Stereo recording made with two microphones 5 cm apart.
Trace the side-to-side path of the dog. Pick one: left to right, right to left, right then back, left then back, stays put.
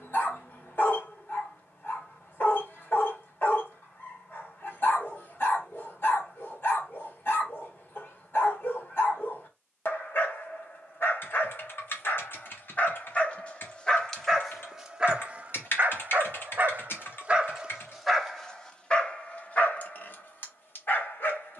right then back.